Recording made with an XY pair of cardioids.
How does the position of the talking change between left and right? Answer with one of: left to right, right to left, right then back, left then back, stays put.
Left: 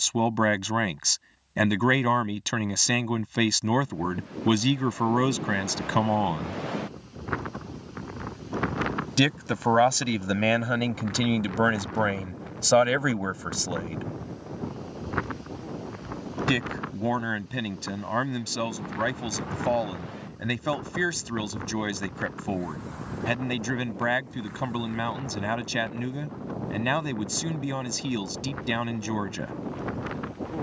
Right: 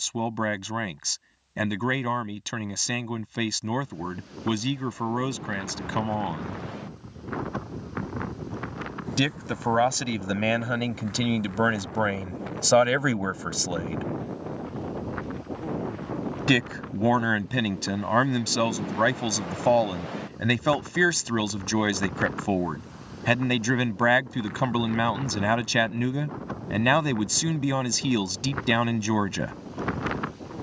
left to right.